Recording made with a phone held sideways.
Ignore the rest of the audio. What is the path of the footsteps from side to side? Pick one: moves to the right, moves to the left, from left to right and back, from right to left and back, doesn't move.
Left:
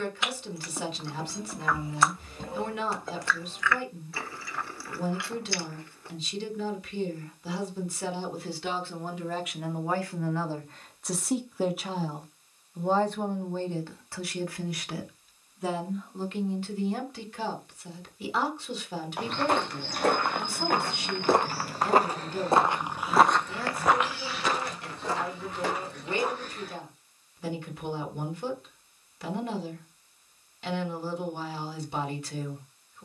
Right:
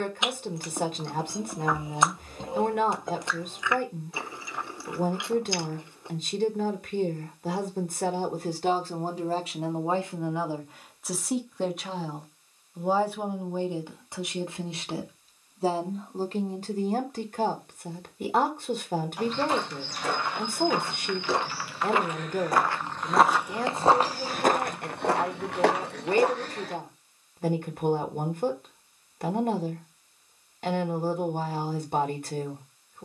moves to the right.